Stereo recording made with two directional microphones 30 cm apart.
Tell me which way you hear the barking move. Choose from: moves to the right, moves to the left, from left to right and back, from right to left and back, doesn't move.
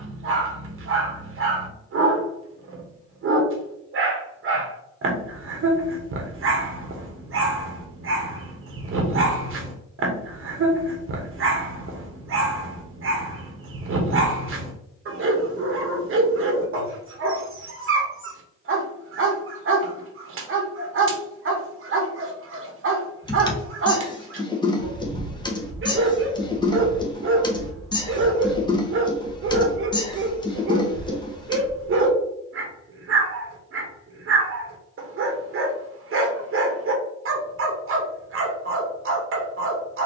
doesn't move.